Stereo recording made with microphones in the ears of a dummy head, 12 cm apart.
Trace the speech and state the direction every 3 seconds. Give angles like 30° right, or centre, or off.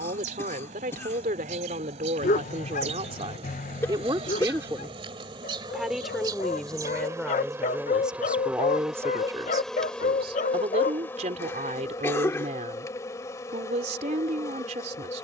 60° right, 30° right, centre, 40° right, 50° right.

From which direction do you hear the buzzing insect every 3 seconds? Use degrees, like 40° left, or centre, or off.
60° right, 50° right, 20° right, 10° left, 30° left.